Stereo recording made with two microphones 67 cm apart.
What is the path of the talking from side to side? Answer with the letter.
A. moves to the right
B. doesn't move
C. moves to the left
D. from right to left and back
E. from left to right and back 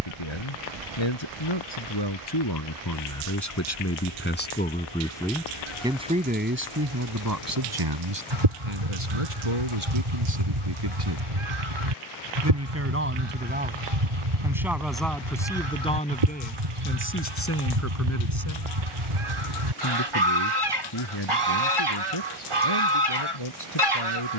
E.